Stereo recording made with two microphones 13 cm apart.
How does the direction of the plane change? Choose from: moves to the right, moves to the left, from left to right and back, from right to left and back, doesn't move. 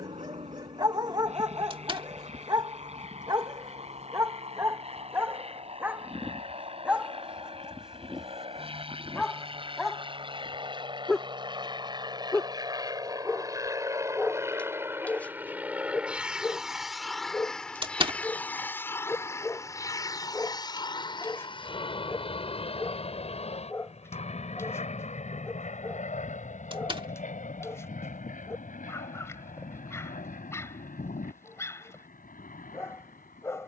moves to the left.